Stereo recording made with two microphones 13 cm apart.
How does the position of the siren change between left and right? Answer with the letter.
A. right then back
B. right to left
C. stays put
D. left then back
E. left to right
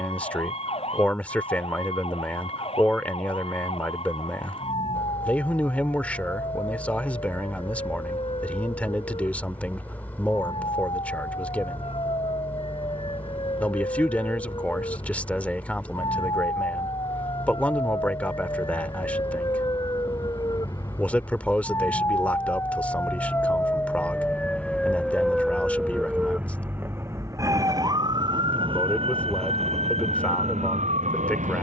E.